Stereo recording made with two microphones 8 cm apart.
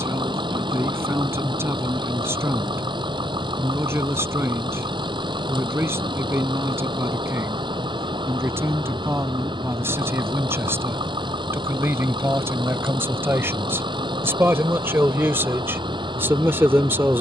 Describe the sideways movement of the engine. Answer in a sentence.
You can hear the engine stay put.